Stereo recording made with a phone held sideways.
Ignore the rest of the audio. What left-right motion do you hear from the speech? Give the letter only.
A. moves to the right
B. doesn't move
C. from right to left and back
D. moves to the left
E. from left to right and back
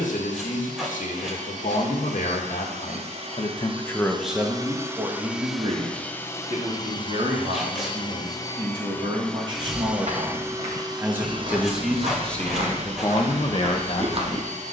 E.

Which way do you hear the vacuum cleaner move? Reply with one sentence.
In this clip you hear the vacuum cleaner move from right to left and back again.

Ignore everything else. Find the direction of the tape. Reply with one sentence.
In this clip you hear the tape in the centre.